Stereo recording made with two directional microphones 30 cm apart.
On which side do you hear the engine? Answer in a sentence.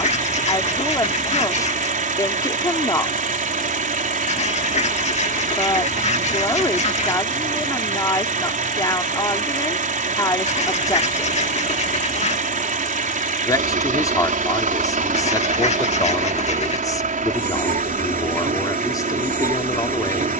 In this clip you hear the engine on the right.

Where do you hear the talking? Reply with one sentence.
You can hear the talking in the centre.